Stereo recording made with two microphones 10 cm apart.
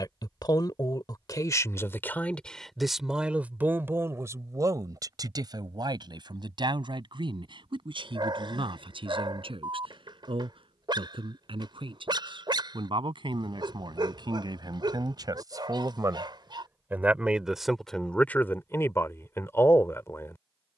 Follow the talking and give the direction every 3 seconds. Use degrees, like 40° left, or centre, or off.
30° left, 30° right, 60° right, 60° right, 50° right, 20° right, 20° left.